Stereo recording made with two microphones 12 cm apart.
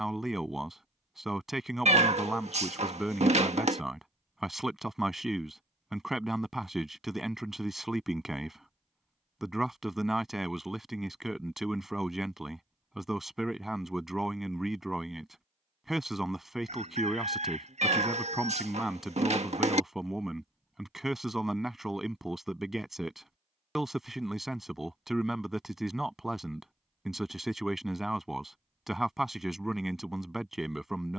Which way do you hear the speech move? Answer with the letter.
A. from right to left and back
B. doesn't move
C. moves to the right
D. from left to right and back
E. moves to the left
B.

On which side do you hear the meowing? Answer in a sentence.
In this clip you hear the meowing on the right.